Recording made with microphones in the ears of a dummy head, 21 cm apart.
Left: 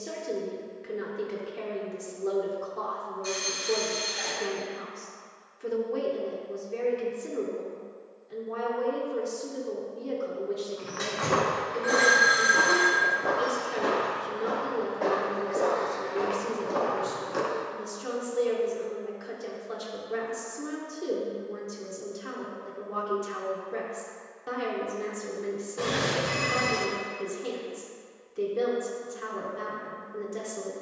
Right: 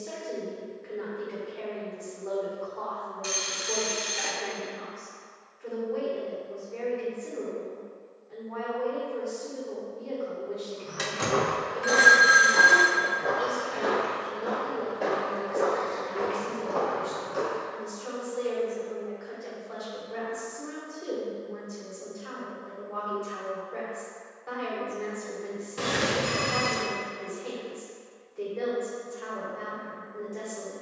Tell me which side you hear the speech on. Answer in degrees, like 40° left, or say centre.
50° left.